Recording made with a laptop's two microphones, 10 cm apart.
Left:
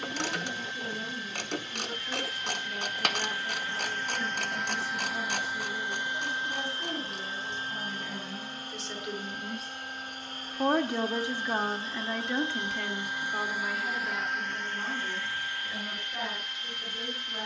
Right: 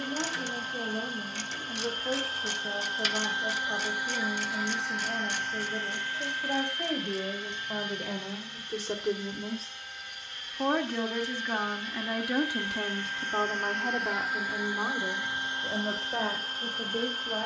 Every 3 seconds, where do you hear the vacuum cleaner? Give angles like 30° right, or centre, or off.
40° right, 10° right, 30° left, 40° left, 10° left, 30° right.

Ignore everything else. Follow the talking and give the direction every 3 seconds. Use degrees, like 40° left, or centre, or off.
70° right, 70° right, 60° right, 10° right, 30° right, 60° right.